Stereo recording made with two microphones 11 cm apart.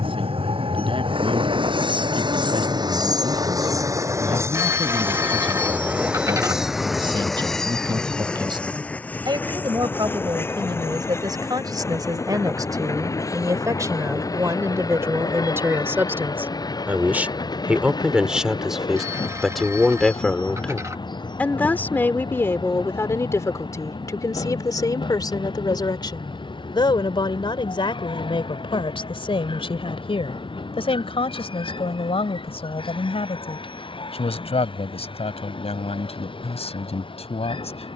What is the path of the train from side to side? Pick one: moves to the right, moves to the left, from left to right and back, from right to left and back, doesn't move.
moves to the left.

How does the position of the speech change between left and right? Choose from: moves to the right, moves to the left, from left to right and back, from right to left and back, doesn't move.
moves to the left.